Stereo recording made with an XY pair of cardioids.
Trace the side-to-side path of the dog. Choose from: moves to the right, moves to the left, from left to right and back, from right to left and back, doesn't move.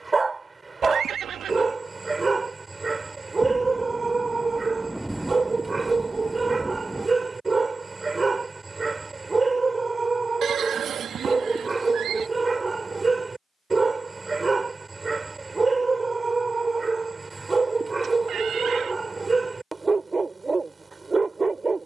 doesn't move.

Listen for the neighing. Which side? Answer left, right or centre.
right.